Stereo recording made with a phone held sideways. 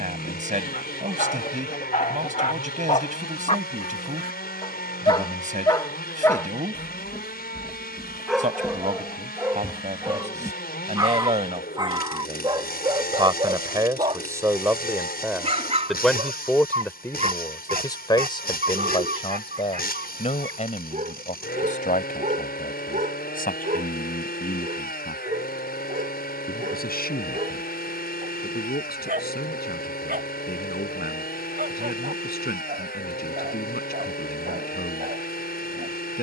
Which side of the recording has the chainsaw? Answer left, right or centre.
left.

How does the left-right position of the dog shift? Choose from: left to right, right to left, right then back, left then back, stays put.
left to right.